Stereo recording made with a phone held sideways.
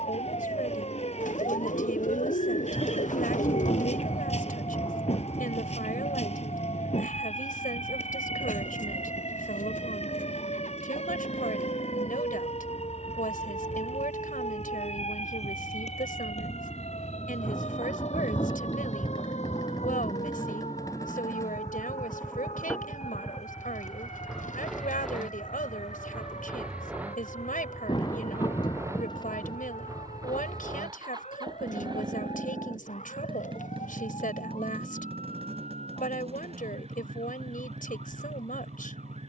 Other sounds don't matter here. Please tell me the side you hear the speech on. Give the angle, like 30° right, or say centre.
70° left.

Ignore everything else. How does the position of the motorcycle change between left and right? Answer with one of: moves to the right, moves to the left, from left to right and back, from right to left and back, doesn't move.
moves to the right.